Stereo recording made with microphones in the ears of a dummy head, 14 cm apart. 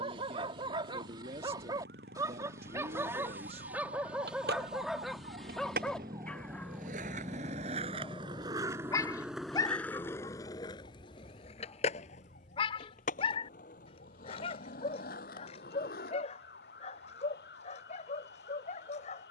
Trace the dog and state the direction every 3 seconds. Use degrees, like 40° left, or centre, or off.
30° right, 10° right, 10° left, 30° left, 40° left, 50° left, 50° left.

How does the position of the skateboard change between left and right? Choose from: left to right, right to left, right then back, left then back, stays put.
right to left.